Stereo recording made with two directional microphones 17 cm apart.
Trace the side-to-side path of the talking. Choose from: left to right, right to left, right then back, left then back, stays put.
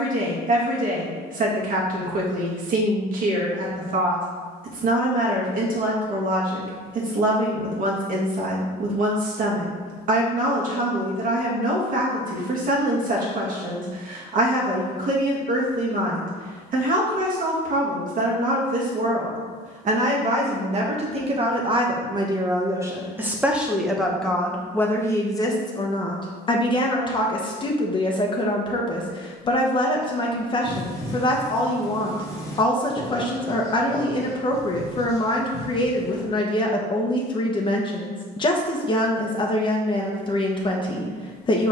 right to left.